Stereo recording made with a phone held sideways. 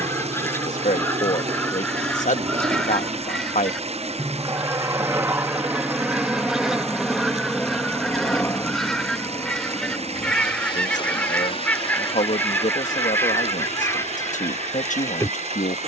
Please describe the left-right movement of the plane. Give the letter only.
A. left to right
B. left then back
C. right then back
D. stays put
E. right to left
E.